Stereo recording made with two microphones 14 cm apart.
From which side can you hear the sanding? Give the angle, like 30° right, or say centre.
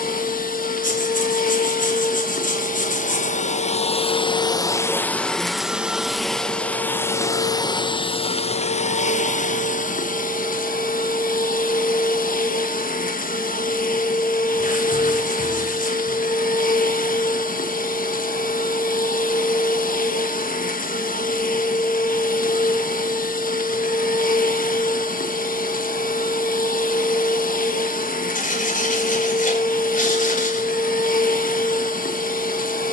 70° left.